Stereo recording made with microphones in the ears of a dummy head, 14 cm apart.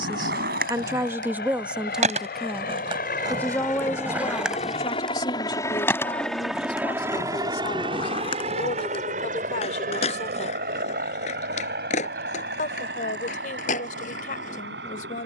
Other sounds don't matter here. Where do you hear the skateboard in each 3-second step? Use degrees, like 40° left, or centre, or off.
50° right, 10° right, 30° left, 40° left, 50° left.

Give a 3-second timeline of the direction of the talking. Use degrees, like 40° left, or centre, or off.
10° right, 20° left, 40° left, 50° left, 50° left.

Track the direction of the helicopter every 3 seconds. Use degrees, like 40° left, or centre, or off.
70° left, 40° left, 20° right, 50° right, 70° right.